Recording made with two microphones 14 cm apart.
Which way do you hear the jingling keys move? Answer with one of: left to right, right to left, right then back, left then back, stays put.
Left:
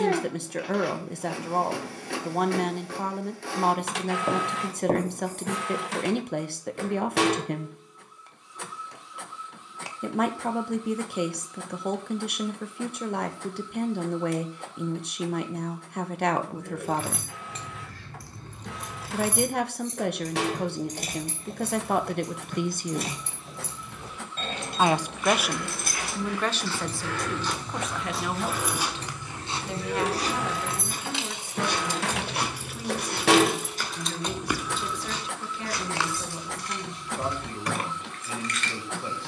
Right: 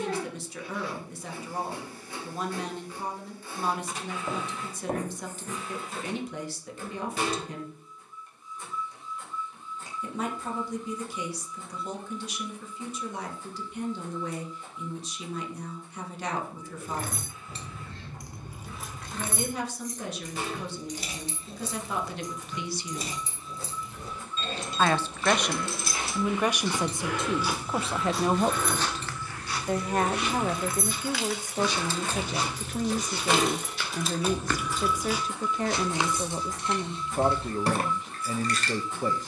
left then back.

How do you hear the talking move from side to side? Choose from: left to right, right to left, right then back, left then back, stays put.
left to right.